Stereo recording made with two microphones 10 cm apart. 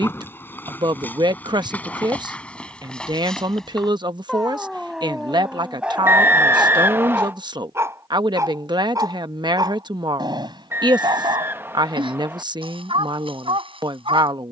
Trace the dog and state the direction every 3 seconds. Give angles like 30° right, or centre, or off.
20° left, centre, 20° right, 50° right, 60° right.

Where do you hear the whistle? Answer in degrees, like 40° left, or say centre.
20° right.